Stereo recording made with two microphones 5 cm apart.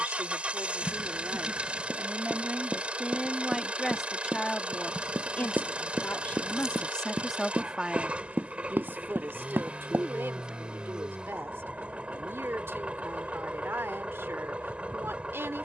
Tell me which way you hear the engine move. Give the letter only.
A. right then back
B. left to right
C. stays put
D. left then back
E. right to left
C.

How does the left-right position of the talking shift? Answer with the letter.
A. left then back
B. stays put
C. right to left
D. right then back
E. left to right
A.